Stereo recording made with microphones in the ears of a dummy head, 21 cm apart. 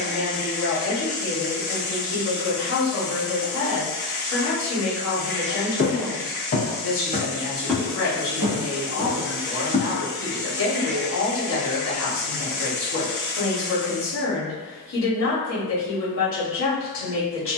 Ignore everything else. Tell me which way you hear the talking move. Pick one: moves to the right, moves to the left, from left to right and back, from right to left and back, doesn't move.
doesn't move.